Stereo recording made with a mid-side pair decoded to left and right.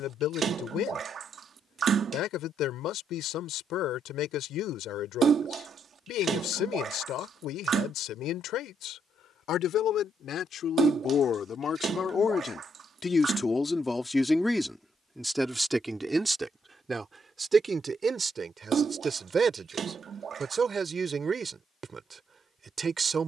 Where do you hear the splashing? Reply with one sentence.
In this clip you hear the splashing on the right.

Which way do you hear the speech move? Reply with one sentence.
You can hear the speech travel towards the right.